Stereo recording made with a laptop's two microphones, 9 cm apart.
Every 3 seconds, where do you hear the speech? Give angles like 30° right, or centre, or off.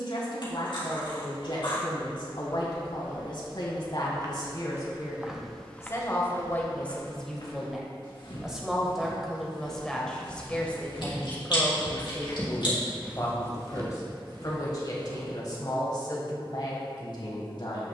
60° left, 50° left, 10° left, 10° left, 40° left, 50° left.